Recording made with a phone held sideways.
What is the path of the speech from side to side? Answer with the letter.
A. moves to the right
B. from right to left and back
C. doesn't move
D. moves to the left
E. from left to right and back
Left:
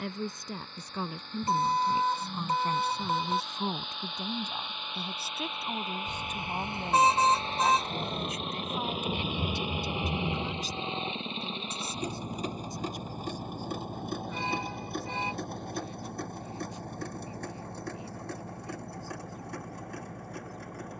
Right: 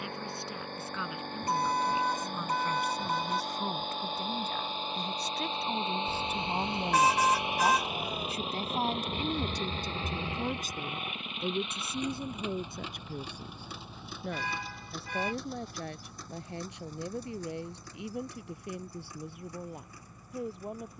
A.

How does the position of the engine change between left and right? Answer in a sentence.
You can hear the engine move to the left.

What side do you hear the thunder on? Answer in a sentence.
In this clip you hear the thunder on the left.